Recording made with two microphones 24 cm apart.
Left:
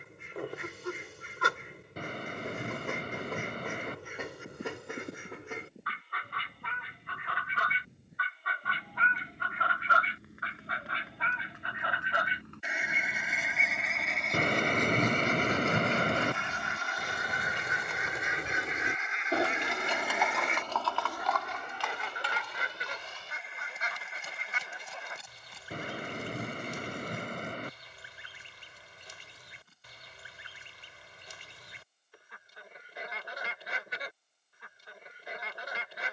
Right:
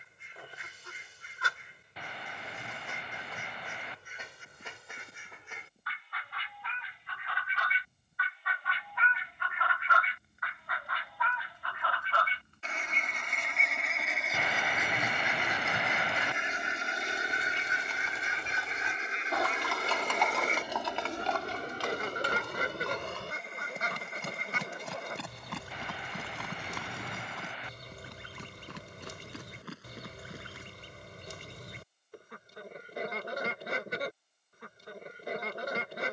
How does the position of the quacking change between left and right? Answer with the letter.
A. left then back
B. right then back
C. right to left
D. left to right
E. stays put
D.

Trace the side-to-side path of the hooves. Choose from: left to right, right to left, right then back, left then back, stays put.
left to right.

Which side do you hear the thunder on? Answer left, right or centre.
left.